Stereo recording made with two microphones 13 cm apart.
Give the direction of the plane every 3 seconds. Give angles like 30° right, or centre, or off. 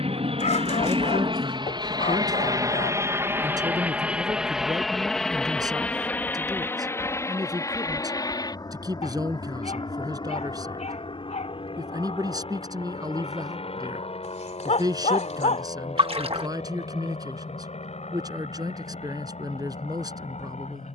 40° right, centre, 20° left, 40° left, 40° left, 50° left, 50° left.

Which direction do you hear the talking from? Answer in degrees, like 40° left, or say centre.
30° right.